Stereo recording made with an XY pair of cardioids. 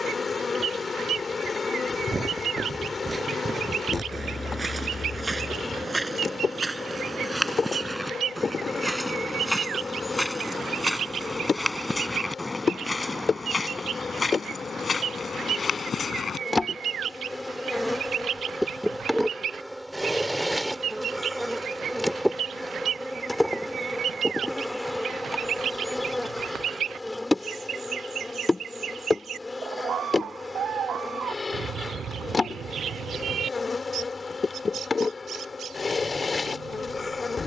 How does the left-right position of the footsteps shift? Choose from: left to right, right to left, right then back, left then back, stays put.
right to left.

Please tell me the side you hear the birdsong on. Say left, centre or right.
right.